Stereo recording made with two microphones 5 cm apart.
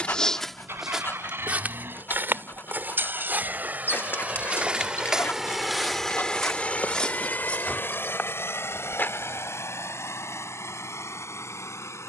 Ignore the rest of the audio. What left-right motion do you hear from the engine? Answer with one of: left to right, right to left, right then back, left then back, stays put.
right to left.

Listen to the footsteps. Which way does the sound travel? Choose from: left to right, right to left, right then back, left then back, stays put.
right then back.